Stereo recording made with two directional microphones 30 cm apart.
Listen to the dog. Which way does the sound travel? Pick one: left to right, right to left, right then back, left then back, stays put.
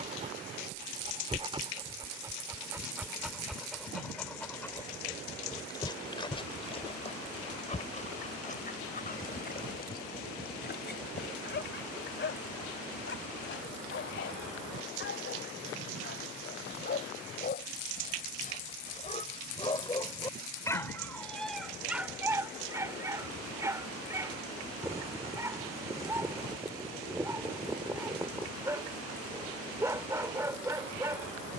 left then back.